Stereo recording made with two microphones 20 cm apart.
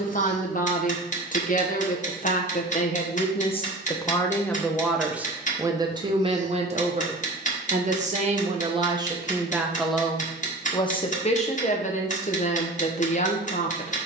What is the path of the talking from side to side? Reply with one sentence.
You can hear the talking go right and come back.